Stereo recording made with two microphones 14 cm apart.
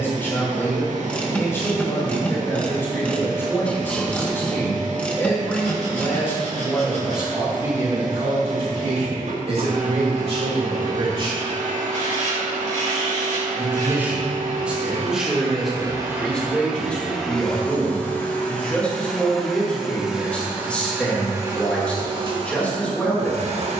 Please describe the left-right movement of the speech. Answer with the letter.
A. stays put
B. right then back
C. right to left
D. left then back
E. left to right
B.